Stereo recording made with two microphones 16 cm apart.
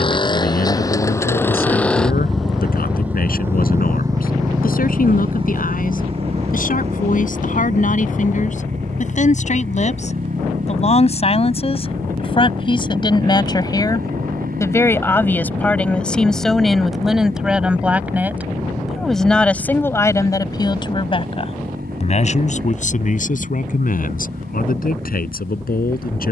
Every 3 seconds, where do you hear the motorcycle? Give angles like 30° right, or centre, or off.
10° left, 30° right, 50° right, 60° right, 60° right, 70° right, 70° right, 70° right, 70° right.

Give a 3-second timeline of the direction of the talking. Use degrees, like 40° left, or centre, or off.
70° left, 70° left, 60° left, 50° left, 30° left, centre, 10° left, 50° left, 70° left.